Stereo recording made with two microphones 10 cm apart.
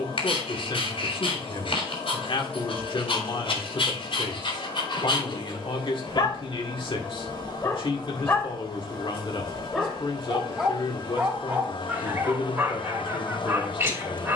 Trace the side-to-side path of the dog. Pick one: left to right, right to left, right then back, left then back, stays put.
left to right.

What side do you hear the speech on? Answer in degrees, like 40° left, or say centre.
60° left.